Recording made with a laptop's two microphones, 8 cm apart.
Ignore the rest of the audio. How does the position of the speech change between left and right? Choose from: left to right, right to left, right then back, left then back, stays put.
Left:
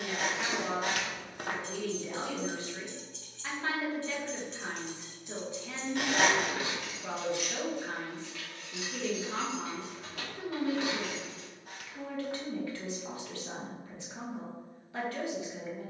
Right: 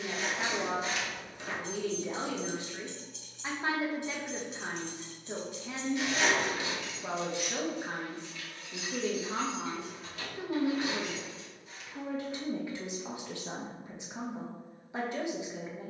stays put.